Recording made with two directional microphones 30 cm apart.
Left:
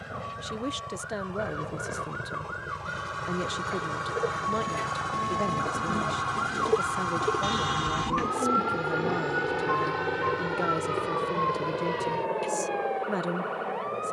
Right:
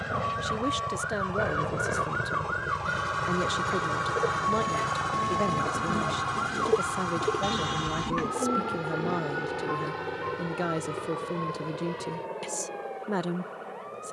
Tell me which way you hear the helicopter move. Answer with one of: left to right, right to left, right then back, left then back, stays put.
right to left.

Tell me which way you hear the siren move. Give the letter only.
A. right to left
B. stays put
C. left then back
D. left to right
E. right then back
A.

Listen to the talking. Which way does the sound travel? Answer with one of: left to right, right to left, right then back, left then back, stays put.
stays put.